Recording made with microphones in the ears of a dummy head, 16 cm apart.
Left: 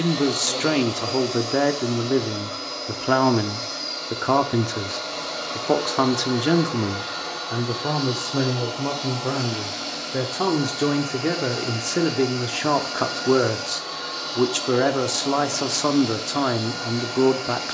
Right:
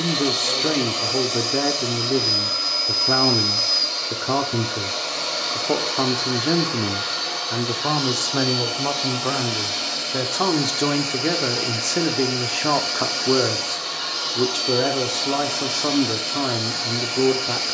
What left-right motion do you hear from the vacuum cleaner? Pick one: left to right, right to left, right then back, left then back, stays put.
stays put.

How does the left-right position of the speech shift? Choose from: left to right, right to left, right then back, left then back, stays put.
right then back.